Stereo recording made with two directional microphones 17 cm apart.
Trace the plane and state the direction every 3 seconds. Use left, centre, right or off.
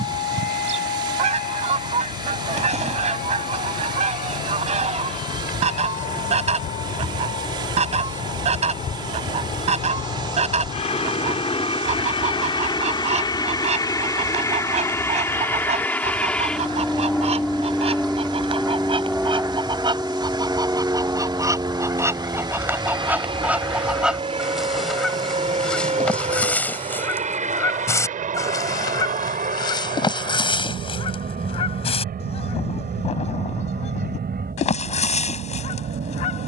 left, left, left, left, left, centre, centre, right, right, right, right, right.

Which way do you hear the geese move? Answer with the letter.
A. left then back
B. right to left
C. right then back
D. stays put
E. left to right
B.